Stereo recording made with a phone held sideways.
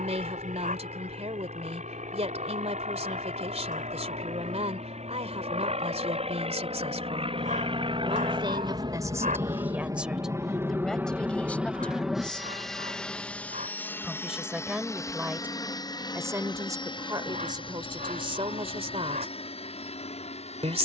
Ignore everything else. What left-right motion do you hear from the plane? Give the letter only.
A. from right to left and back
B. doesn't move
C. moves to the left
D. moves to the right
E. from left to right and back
C.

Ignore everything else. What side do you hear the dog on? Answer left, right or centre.
right.